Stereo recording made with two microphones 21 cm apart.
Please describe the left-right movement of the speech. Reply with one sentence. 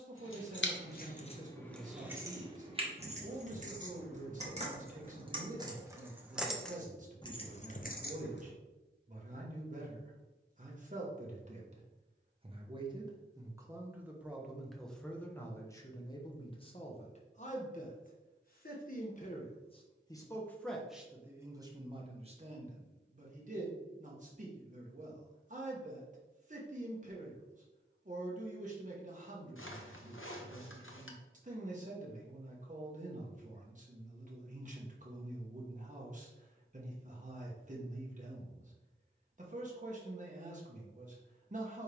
You can hear the speech move from right to left and back again.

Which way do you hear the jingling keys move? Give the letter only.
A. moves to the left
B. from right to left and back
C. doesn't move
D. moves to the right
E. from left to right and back
E.